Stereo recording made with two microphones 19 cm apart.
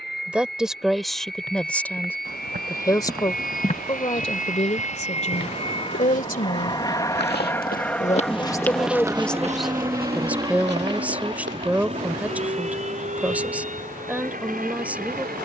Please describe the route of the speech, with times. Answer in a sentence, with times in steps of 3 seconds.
In this clip you hear the speech in the centre from 0 s, on the left from 3 s and in the centre from 9 s.